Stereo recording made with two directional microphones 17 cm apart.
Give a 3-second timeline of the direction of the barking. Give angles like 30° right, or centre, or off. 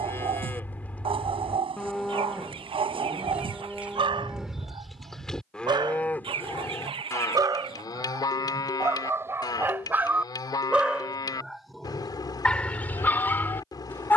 30° right, 30° right, 20° right, 10° right, 10° left.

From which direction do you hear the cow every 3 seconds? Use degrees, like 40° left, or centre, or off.
centre, centre, 20° left, 20° left, 20° left.